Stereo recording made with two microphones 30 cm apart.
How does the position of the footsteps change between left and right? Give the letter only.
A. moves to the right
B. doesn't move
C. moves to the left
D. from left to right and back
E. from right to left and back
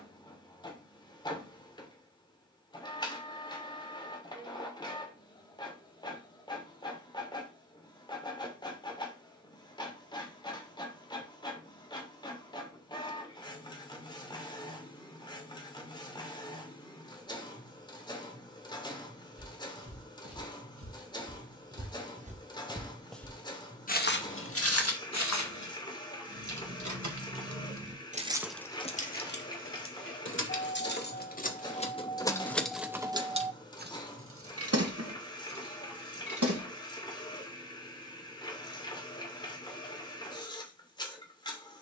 C.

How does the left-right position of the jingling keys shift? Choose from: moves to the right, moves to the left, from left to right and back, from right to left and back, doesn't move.
from right to left and back.